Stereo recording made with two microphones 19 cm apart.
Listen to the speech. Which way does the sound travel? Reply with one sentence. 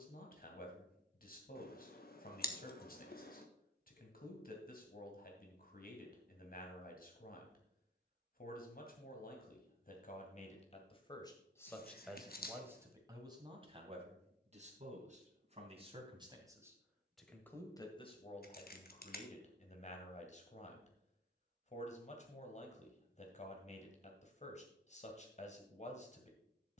In this clip you hear the speech go right and come back.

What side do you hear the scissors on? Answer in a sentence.
In this clip you hear the scissors on the left.